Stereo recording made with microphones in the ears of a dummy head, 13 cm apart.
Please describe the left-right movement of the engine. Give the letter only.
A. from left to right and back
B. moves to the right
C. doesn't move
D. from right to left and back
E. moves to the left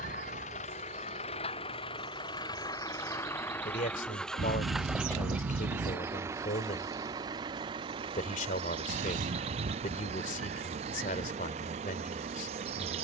B.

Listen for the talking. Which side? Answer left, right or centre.
left.